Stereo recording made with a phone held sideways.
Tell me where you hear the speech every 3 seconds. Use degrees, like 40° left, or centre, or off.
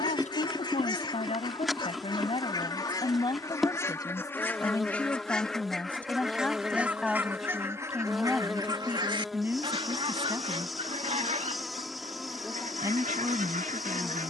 40° left, 20° left, centre, 20° right, 20° right.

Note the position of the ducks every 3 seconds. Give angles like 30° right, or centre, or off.
30° left, 10° left, 20° right, 40° right, 60° right.